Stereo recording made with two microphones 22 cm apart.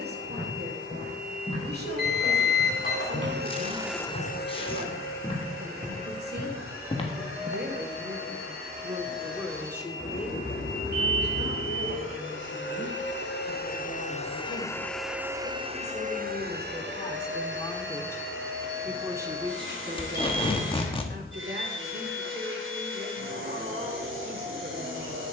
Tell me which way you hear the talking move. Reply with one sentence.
You can hear the talking move from right to left and back again.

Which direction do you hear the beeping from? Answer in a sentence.
In this clip you hear the beeping on the left.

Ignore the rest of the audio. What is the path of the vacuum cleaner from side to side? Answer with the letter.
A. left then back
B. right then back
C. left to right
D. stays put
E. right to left
A.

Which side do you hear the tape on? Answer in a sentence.
In this clip you hear the tape on the left.